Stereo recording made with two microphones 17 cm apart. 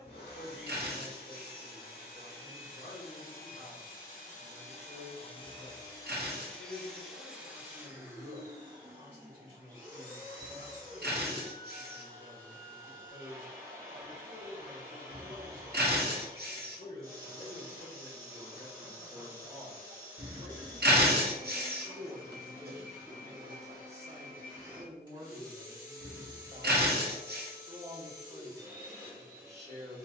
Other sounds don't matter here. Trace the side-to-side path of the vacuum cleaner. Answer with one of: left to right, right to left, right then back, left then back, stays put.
left to right.